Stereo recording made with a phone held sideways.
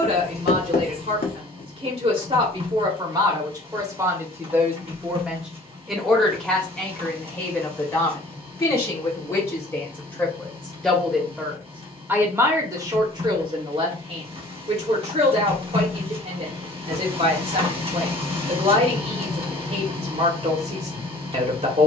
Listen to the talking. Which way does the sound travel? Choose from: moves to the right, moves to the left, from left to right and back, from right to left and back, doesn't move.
from right to left and back.